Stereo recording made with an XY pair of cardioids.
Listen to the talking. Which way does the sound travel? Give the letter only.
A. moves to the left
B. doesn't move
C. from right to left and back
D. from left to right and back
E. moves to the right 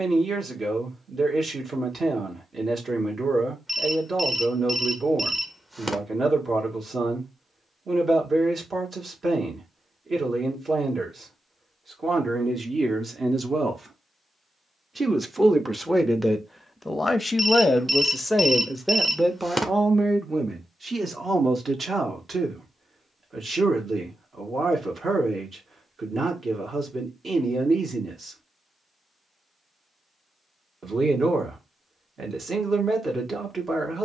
C.